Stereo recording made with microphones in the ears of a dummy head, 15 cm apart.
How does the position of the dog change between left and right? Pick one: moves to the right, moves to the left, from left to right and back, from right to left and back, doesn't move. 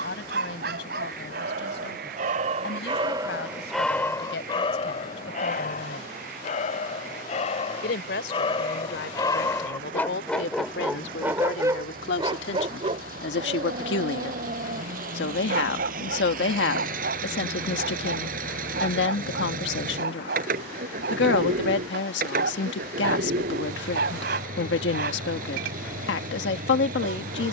from right to left and back.